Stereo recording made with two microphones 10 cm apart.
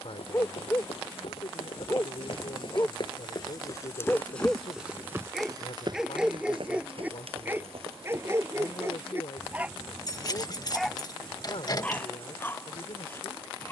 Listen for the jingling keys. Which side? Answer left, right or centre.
left.